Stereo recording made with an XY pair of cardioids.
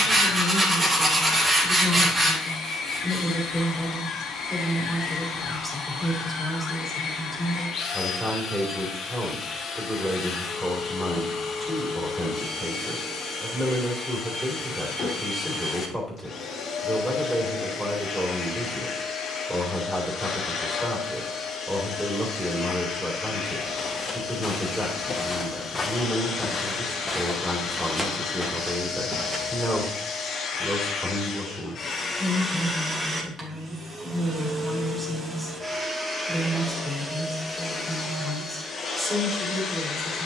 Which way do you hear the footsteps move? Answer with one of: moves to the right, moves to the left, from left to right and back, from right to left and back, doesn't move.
moves to the right.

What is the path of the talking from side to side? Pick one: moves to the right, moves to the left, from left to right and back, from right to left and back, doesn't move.
doesn't move.